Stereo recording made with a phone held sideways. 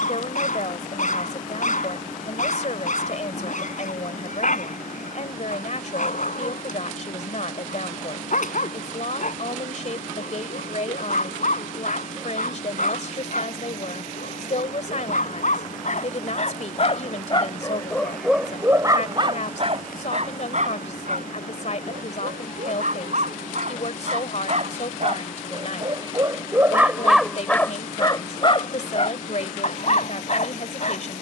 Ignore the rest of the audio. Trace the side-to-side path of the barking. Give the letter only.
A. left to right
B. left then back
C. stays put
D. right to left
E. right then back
E.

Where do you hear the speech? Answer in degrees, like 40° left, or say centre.
60° left.